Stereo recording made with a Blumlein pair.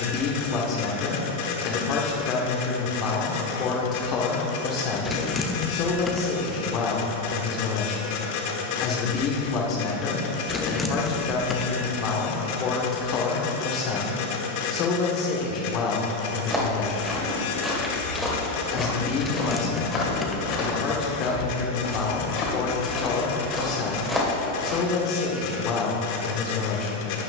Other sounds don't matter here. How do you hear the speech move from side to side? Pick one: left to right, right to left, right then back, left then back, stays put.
stays put.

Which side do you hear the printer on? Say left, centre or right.
left.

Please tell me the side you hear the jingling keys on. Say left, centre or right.
centre.